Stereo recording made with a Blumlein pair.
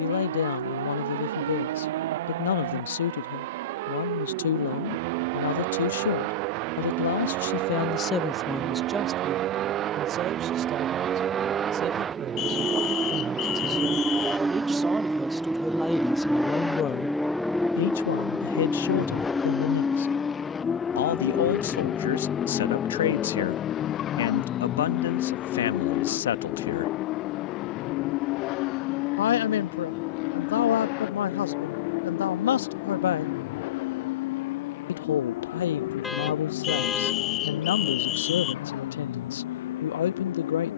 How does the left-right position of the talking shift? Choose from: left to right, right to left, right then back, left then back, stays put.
right then back.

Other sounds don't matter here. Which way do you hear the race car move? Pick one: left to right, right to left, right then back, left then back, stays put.
right to left.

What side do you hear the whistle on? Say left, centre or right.
left.